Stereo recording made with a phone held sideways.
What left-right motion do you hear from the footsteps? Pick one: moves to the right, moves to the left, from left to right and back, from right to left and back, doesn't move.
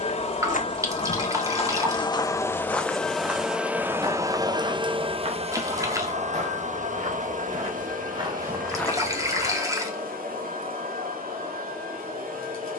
from left to right and back.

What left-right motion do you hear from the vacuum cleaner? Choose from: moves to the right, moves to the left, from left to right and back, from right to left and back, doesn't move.
moves to the right.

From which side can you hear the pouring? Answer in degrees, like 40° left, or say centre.
20° right.